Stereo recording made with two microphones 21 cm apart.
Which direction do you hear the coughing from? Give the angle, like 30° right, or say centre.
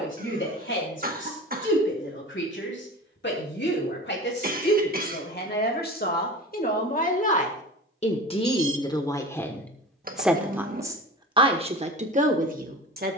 40° right.